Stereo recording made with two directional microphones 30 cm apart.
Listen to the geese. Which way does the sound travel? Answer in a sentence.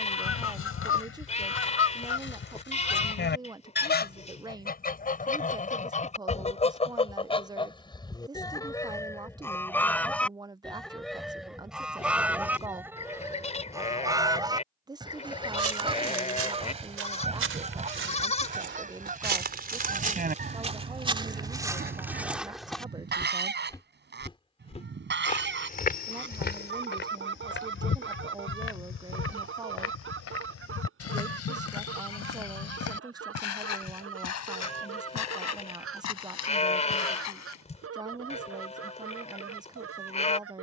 In this clip you hear the geese go from the left side to the right.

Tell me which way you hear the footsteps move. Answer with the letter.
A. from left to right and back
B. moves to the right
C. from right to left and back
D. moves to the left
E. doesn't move
D.